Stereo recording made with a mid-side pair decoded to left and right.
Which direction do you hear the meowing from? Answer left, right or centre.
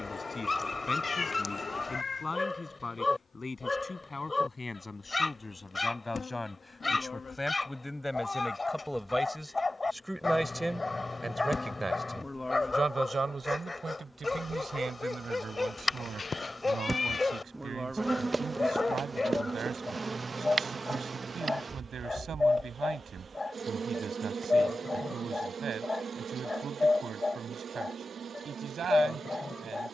left.